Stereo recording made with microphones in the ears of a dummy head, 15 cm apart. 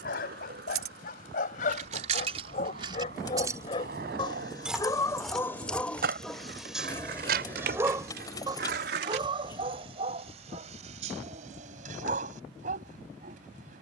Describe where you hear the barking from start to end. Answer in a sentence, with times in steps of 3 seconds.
In this clip you hear the barking on the left from 0 s, in the centre from 6 s and on the right from 9 s.